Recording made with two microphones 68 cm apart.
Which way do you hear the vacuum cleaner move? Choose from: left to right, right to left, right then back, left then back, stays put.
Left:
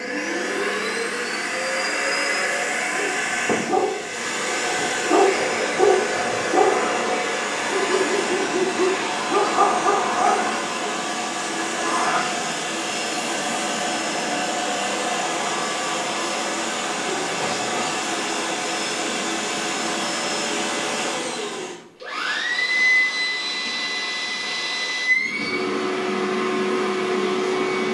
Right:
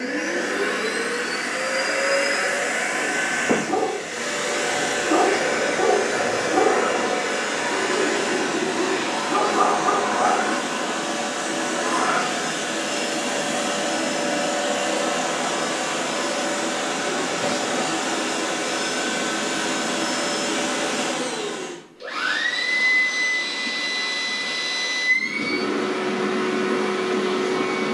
stays put.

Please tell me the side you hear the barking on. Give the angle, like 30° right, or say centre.
centre.